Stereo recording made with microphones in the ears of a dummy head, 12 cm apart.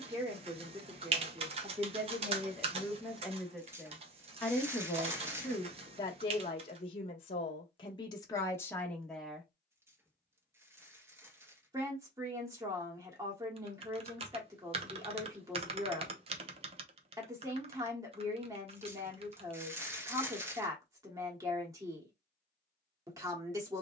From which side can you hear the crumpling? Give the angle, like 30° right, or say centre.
20° right.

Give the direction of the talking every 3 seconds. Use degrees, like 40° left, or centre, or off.
20° right, 10° left, 30° left, 10° right, 20° right, 20° right, 20° right, 20° right.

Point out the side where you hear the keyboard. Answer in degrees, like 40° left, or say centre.
40° right.